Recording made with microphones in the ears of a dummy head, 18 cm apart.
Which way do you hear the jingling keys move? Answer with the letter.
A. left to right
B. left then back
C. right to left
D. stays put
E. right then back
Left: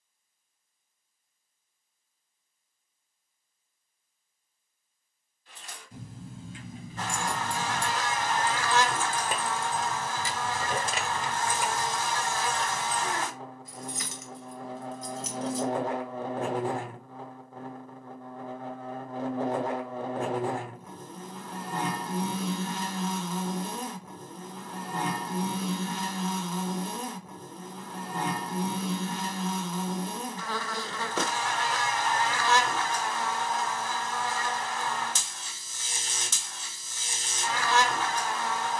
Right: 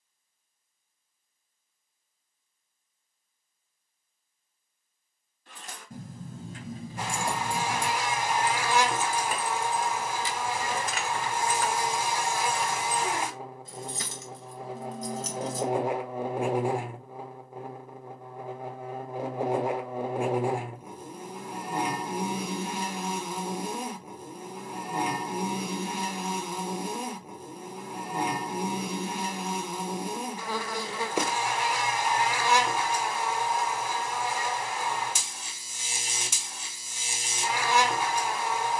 B.